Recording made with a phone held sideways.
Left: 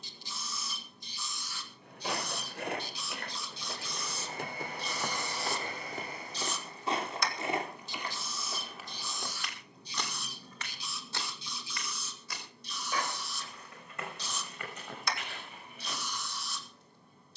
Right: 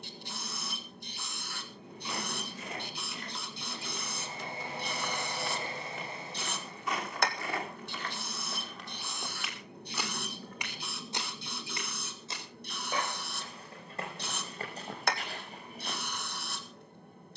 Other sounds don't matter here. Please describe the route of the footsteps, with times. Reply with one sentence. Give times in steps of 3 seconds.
You can hear the footsteps on the left from 0 s, in the centre from 9 s and on the right from 12 s.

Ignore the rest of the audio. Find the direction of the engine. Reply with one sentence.
You can hear the engine on the right.